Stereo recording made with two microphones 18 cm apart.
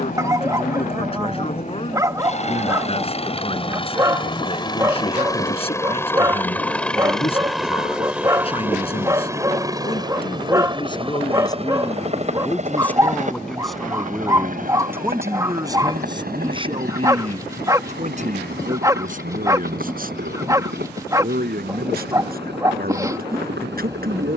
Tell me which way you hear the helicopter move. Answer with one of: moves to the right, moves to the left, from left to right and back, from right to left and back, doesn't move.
moves to the right.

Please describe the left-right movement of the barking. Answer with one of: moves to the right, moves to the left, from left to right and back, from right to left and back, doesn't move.
doesn't move.